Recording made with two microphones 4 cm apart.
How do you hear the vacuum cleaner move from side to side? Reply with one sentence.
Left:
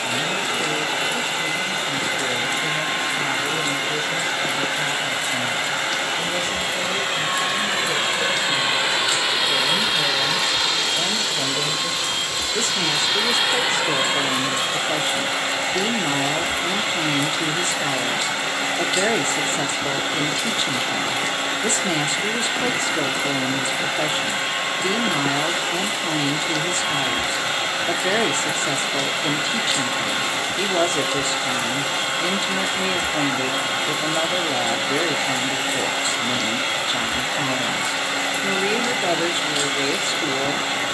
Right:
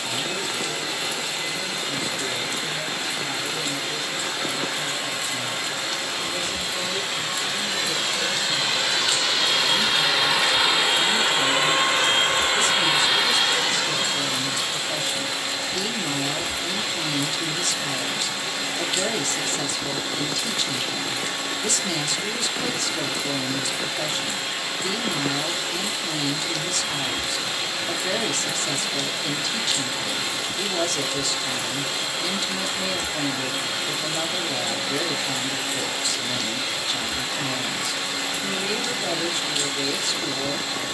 In this clip you hear the vacuum cleaner move from left to right and back again.